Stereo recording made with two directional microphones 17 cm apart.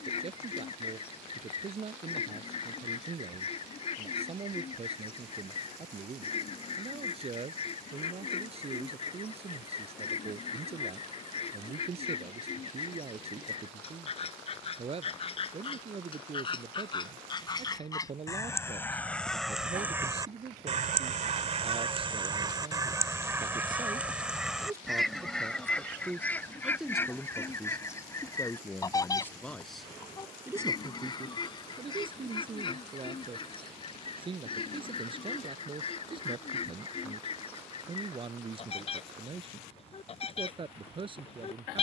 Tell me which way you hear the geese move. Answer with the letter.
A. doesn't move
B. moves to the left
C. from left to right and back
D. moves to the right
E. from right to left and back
C.